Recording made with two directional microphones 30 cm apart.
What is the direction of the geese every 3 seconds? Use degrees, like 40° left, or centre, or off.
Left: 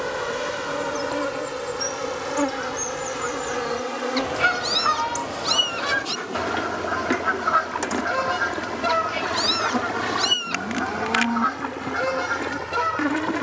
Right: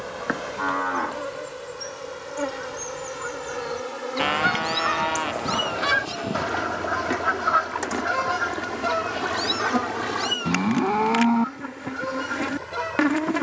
60° left, 30° left, 10° left, 40° left, 60° left.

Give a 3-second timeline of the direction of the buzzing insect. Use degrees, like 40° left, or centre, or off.
60° left, 50° left, 30° left, centre, 10° right.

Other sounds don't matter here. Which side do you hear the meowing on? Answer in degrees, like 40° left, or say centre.
60° left.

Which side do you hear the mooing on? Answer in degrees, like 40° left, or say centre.
60° right.